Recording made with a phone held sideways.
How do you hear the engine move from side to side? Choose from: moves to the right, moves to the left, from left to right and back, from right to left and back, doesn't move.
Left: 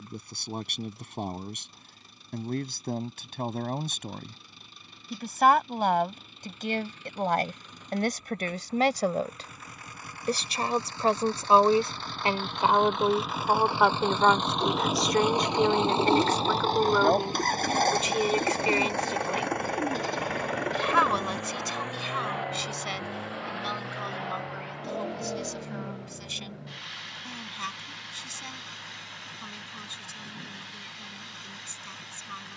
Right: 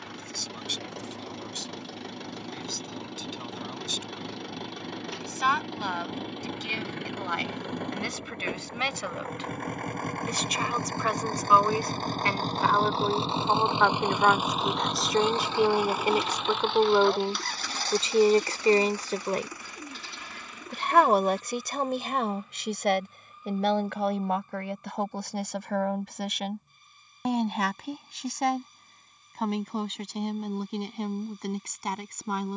moves to the left.